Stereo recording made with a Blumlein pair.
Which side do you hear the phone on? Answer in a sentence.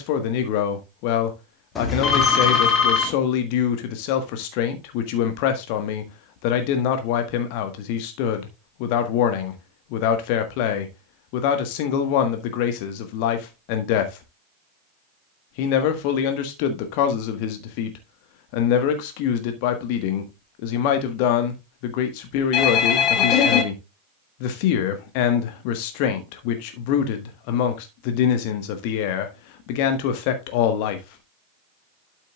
You can hear the phone on the left.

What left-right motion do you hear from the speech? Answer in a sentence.
In this clip you hear the speech stay in one place.